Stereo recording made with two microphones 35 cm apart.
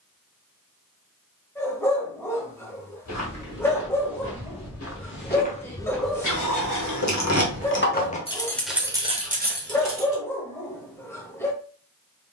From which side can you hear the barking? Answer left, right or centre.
centre.